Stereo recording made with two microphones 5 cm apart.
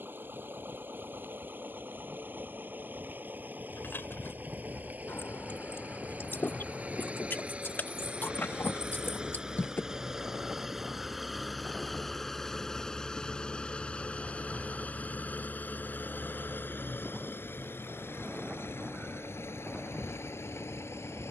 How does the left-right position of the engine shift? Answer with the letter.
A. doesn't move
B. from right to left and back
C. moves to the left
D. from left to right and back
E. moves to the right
C.